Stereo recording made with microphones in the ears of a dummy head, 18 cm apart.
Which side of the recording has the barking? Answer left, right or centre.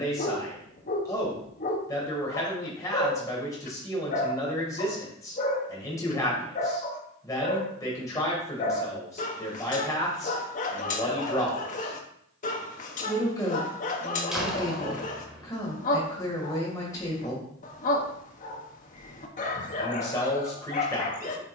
left.